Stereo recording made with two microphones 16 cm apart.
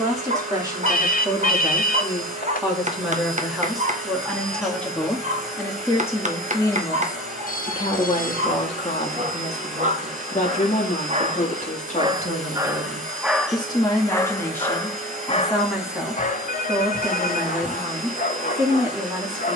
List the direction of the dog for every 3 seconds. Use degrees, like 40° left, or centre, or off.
50° right, 50° right, 50° right, 40° right, centre, 50° left, 60° left.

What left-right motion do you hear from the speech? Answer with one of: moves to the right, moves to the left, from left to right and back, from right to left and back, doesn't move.
from right to left and back.